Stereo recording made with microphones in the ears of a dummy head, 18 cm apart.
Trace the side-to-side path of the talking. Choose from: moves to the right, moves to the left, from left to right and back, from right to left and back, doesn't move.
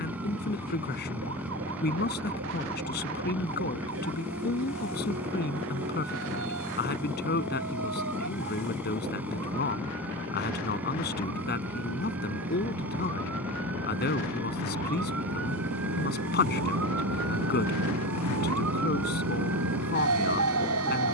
doesn't move.